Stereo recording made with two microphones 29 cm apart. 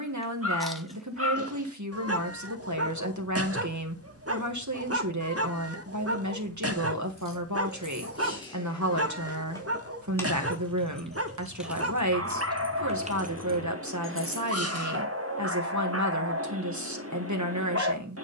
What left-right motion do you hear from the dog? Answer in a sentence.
In this clip you hear the dog stay put.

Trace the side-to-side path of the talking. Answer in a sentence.
You can hear the talking stay in one place.